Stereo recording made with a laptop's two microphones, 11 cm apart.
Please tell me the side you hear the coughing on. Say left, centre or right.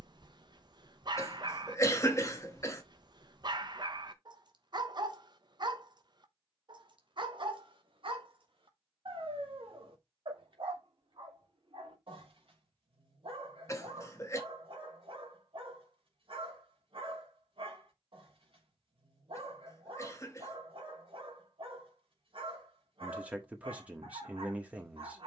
left.